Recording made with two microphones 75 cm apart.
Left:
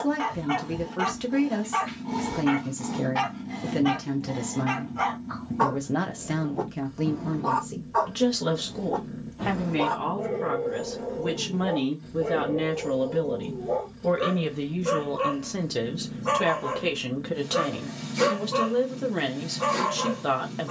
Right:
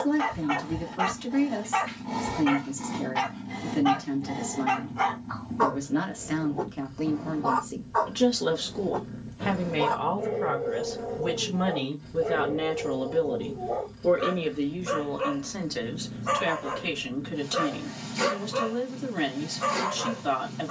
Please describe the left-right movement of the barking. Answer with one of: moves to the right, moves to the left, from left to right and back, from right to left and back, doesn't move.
moves to the left.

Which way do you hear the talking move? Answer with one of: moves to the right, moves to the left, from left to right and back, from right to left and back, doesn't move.
from left to right and back.